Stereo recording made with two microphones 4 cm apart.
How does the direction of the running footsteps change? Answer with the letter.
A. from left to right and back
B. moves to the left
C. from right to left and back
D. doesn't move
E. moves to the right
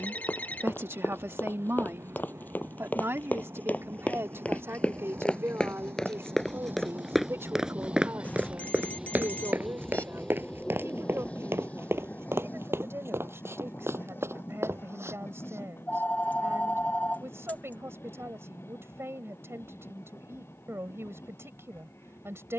E.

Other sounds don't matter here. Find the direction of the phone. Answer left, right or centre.
left.